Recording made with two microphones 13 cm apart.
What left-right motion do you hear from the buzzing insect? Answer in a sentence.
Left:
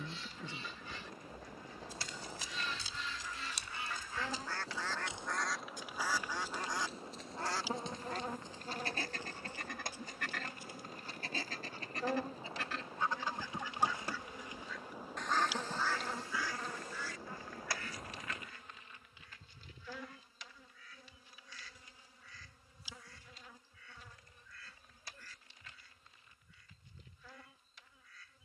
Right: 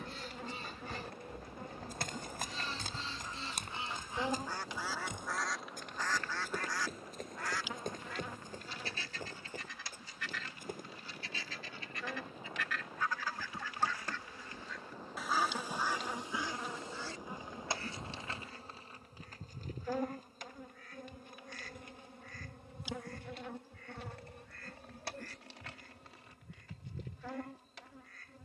In this clip you hear the buzzing insect move from right to left and back again.